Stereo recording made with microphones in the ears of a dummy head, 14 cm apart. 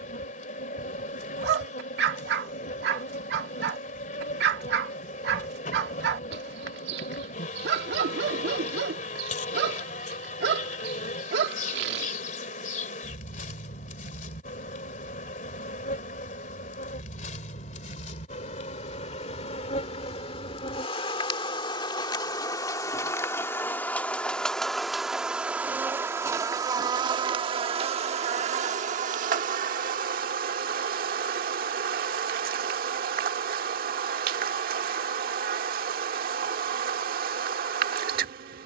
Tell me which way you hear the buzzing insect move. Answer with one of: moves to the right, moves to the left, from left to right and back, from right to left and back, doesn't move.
moves to the right.